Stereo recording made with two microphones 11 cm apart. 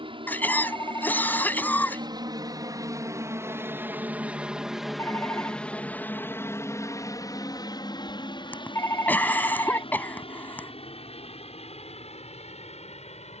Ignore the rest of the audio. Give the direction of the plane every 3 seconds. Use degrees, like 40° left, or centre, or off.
50° right, 10° right, 30° left, 50° left, 60° left.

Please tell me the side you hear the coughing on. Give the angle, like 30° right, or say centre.
20° left.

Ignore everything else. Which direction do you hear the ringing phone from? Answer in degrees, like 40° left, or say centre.
20° left.